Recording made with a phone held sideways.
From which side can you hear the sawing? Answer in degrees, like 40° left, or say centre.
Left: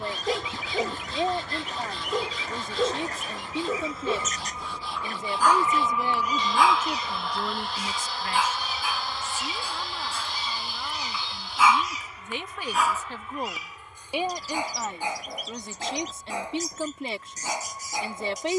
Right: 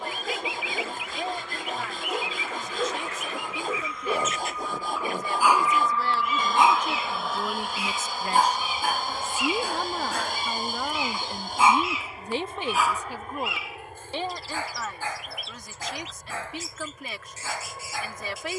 50° right.